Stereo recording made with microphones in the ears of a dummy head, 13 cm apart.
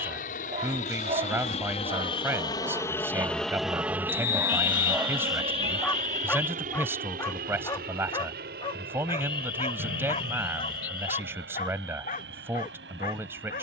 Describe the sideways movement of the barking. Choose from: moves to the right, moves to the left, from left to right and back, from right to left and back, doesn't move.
moves to the left.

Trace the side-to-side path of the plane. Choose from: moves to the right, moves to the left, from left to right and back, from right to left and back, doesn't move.
moves to the right.